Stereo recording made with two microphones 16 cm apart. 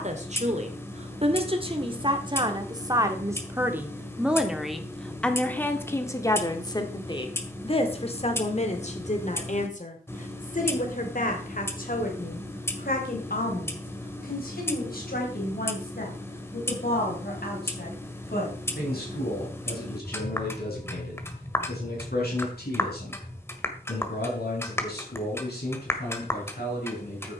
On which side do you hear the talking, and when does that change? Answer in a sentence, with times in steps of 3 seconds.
In this clip you hear the talking on the right from 0 s, in the centre from 3 s and on the left from 6 s.